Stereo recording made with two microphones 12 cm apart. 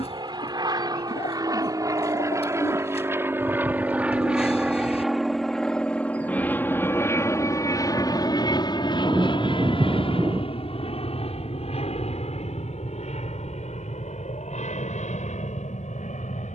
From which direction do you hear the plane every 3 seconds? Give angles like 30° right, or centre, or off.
30° right, 10° right, 30° left, 50° left, 60° left, 70° left.